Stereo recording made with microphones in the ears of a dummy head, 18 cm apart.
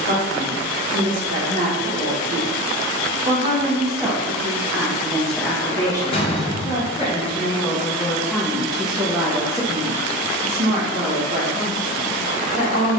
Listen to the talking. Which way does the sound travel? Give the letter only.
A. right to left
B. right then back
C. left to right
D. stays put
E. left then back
E.